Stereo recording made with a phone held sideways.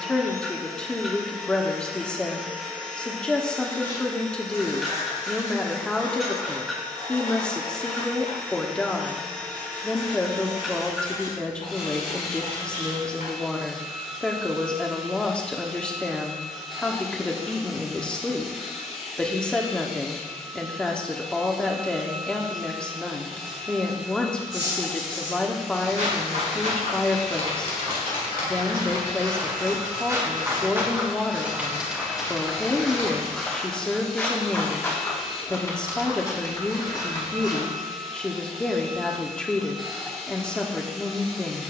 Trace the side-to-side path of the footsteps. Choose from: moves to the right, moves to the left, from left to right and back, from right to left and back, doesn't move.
moves to the left.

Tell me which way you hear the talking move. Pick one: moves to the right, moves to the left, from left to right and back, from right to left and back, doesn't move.
doesn't move.